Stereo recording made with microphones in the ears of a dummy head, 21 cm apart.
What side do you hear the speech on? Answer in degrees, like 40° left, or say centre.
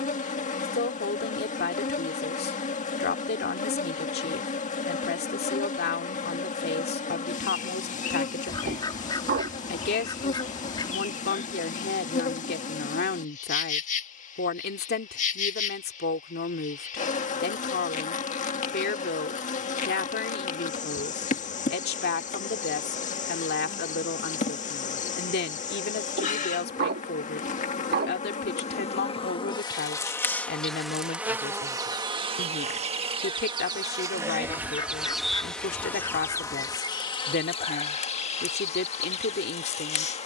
50° left.